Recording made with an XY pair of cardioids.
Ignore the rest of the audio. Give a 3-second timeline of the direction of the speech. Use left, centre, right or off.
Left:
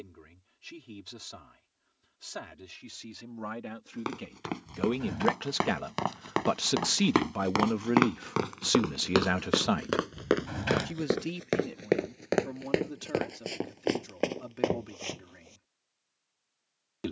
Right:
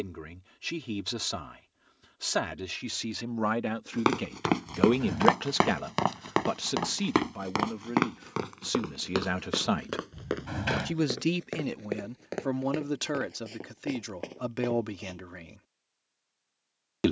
right, right, left, right, right, right.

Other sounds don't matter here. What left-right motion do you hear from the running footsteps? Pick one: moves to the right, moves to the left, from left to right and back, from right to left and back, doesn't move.
moves to the left.